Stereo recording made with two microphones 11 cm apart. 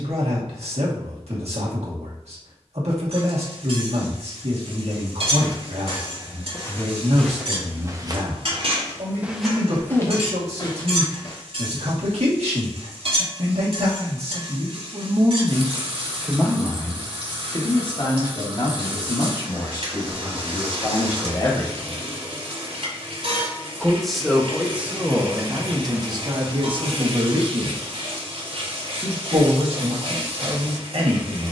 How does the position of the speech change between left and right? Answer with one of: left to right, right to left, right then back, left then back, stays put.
left then back.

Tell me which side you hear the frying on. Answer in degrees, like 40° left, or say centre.
60° right.